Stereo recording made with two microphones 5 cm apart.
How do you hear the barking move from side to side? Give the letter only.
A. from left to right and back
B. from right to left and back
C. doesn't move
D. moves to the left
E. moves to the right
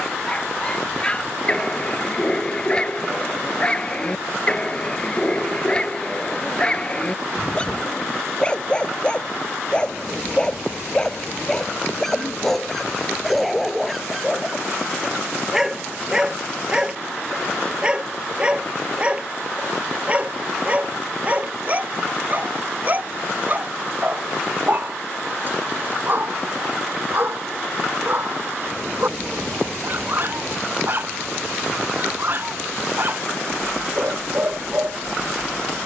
E.